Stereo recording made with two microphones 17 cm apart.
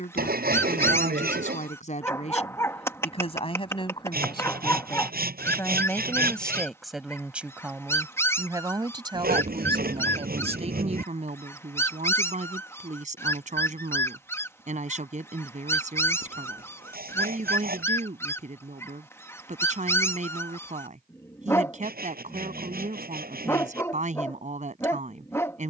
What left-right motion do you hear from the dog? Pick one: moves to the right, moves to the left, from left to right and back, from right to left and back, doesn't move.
doesn't move.